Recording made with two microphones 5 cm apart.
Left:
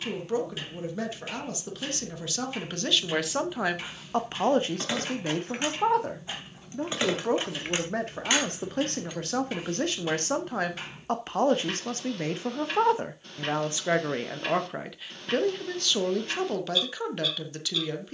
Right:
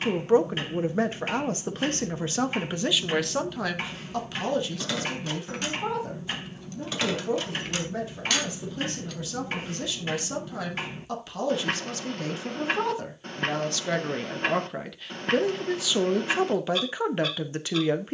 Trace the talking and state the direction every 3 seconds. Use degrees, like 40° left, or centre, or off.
30° right, 30° left, 60° left, 50° left, 20° left, 20° right.